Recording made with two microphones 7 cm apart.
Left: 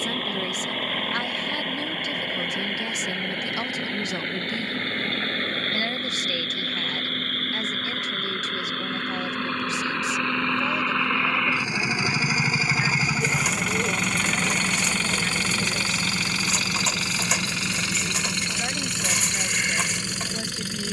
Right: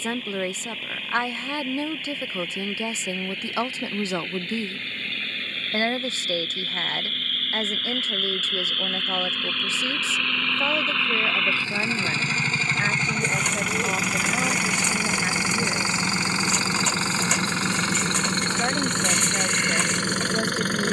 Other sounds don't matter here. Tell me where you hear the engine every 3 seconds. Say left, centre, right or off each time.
left, left, left, left, centre, right, right.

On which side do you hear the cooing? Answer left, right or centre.
centre.